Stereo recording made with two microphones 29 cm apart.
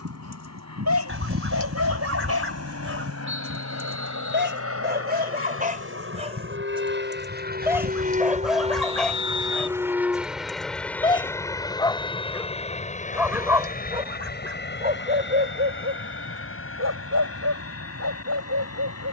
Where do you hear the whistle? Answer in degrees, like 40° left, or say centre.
40° right.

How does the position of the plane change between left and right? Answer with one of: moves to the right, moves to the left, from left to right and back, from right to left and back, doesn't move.
moves to the left.